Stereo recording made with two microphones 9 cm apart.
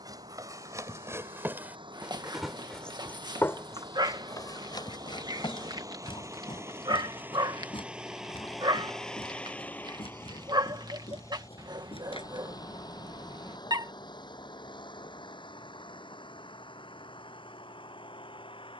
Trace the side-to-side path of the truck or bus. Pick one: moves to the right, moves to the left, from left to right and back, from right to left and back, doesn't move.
moves to the left.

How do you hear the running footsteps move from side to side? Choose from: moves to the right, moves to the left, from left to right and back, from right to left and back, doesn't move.
moves to the left.